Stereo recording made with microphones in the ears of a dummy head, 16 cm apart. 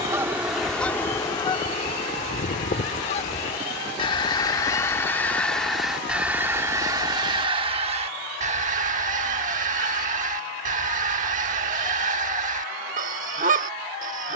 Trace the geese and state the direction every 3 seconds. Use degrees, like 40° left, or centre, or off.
20° left, 20° left, 30° right, 40° right, 40° right.